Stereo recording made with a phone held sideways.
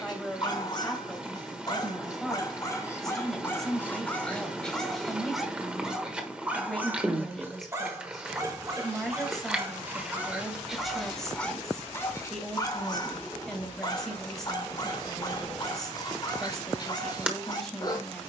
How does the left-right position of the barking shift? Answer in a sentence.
In this clip you hear the barking go right and come back.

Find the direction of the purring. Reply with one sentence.
You can hear the purring in the centre.